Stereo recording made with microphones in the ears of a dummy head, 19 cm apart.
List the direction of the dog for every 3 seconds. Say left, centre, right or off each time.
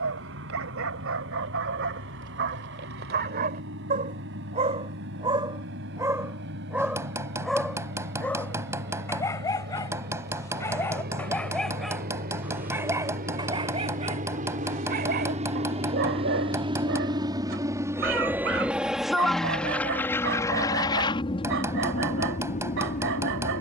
right, right, centre, centre, right, right, right, right.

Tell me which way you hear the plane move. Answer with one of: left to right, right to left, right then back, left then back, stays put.
right to left.